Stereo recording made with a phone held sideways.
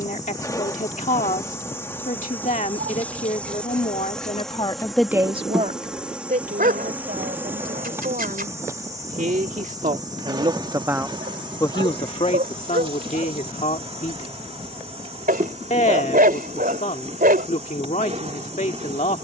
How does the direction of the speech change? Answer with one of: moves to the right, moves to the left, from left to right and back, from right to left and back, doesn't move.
from left to right and back.